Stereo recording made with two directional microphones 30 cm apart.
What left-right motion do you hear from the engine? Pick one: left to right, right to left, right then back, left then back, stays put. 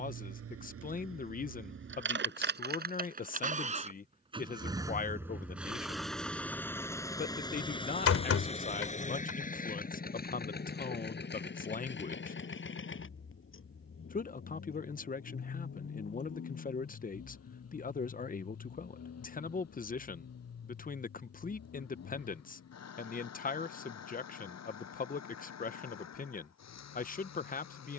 right to left.